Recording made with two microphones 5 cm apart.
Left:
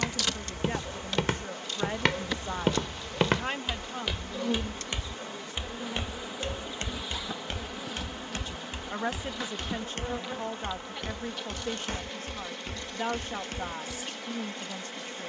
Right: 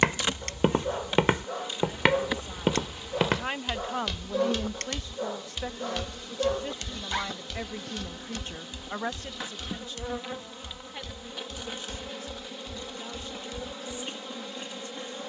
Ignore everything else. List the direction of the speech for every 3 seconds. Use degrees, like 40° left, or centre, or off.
50° left, 40° right, 60° right, 50° left, 60° left.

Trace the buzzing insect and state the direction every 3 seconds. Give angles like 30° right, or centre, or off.
20° right, centre, 10° left, 10° right, 20° right.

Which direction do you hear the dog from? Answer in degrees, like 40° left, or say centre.
50° right.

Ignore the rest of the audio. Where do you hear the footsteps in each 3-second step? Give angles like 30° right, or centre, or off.
30° right, 10° left, 30° left, 50° left, 50° left.